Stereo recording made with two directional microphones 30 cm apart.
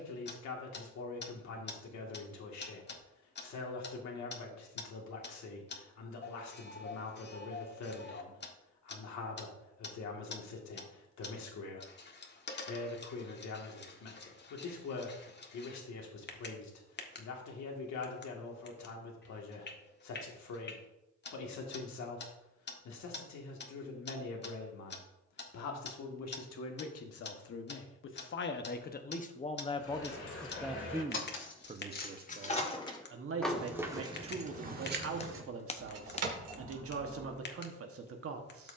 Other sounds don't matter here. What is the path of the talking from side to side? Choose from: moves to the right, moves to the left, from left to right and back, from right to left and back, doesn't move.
moves to the right.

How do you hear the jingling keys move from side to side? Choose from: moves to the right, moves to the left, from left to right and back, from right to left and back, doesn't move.
moves to the right.